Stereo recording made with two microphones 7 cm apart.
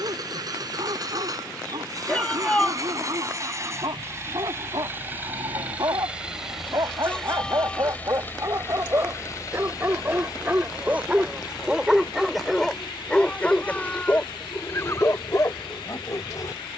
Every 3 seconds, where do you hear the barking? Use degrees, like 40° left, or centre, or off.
70° right, 60° right, 50° right, 20° right, 20° left, 40° left.